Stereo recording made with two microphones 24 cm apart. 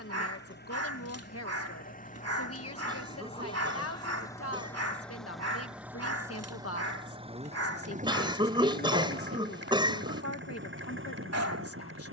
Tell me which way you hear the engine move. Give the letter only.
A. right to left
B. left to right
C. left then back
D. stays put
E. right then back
B.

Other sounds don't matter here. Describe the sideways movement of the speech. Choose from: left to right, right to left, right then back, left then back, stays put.
stays put.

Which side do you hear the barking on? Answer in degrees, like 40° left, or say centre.
90° right.